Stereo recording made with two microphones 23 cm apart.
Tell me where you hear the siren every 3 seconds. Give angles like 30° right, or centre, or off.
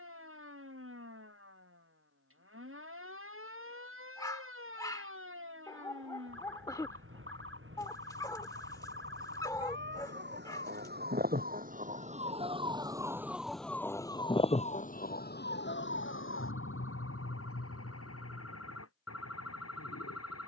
70° right, 70° right, 60° right, 50° right, centre, 60° left, 80° left.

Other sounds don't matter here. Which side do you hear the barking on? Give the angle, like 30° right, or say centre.
20° left.